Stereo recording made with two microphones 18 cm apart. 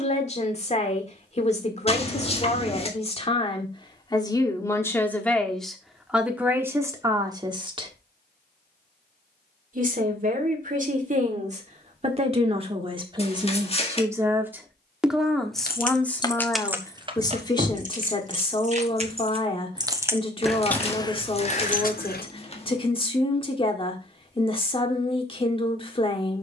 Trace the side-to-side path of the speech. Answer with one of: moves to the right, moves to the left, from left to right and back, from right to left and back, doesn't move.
from left to right and back.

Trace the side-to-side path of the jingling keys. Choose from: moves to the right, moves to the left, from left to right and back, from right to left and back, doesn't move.
from left to right and back.